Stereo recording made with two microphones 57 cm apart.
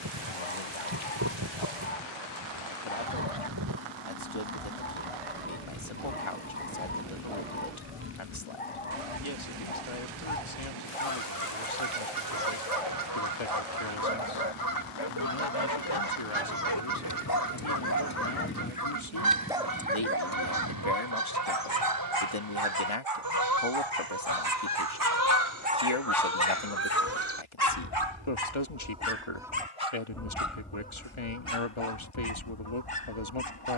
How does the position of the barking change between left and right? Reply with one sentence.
In this clip you hear the barking move from left to right and back again.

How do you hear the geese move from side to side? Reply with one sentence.
In this clip you hear the geese go from the right side to the left.